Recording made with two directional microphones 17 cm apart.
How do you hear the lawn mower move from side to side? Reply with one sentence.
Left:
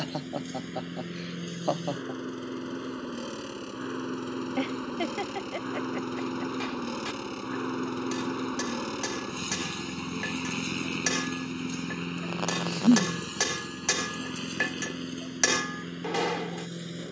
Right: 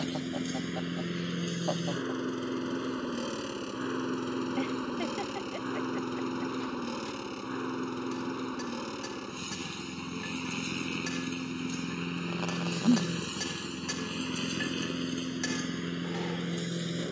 You can hear the lawn mower move from right to left and back again.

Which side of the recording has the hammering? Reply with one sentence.
You can hear the hammering on the left.